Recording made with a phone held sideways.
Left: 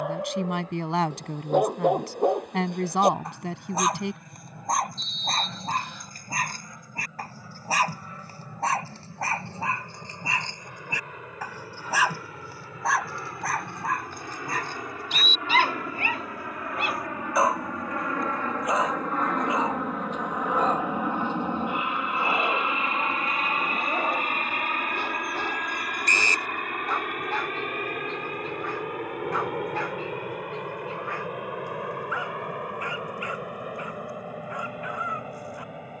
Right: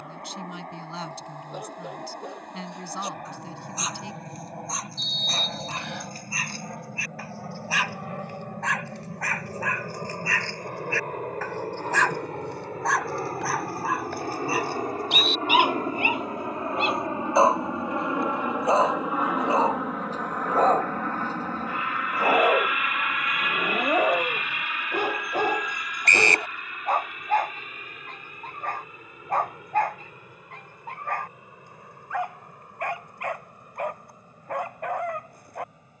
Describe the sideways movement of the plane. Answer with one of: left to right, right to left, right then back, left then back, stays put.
right to left.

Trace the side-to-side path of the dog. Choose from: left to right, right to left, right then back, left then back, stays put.
left to right.